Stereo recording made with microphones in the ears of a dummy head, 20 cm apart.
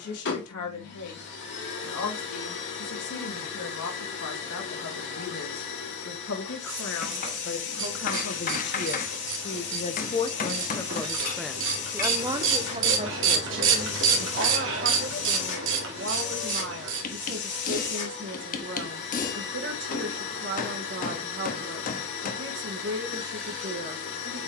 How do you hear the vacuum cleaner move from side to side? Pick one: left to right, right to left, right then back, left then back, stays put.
stays put.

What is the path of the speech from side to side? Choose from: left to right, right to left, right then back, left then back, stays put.
left to right.